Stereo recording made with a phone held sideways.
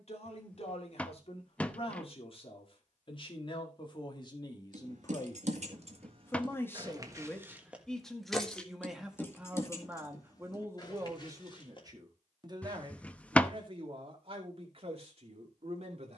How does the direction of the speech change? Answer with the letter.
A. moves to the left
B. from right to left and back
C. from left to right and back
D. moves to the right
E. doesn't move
D.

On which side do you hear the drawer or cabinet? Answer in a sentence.
You can hear the drawer or cabinet in the centre.